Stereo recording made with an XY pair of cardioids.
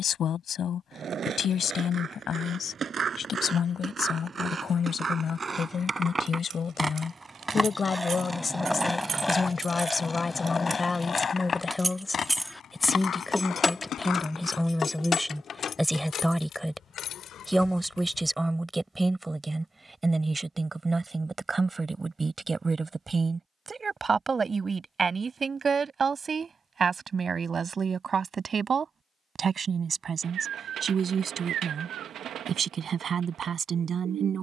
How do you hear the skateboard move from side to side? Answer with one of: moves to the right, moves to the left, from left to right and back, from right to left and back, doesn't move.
moves to the left.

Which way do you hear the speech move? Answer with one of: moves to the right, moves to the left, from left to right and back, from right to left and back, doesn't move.
moves to the right.